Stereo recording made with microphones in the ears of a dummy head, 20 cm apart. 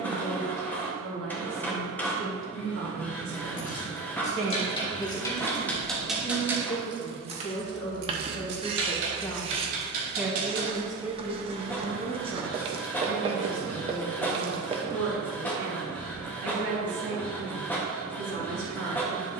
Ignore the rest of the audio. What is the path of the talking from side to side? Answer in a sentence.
In this clip you hear the talking go left and come back.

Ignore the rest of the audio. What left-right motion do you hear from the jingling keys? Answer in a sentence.
In this clip you hear the jingling keys travel towards the right.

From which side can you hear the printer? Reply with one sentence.
You can hear the printer in the centre.